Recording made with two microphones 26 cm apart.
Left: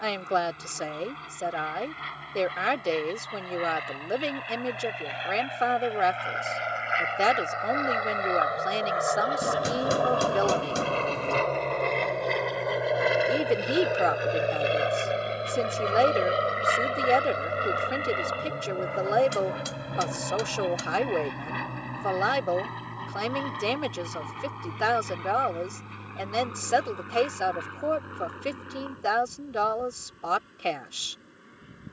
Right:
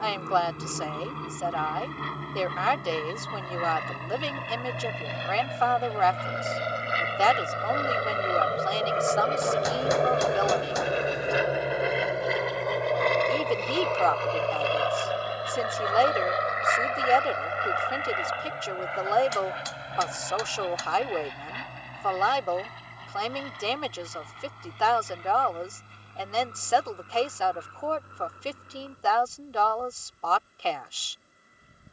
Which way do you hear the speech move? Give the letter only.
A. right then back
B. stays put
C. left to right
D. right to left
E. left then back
B.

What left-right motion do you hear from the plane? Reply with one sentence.
In this clip you hear the plane go from the right side to the left.